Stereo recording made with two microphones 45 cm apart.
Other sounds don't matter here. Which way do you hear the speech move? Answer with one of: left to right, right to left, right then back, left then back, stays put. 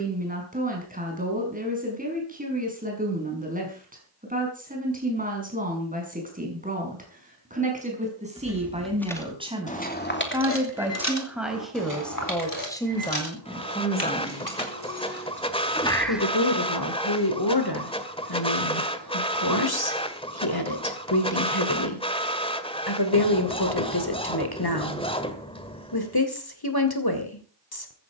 right to left.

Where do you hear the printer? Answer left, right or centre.
centre.